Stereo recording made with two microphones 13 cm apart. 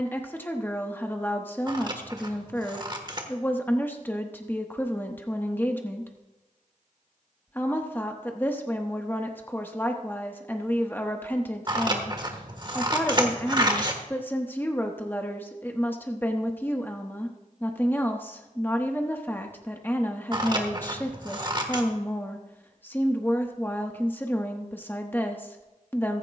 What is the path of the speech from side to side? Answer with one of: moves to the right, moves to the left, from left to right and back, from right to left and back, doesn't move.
doesn't move.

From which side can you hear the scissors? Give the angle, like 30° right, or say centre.
30° right.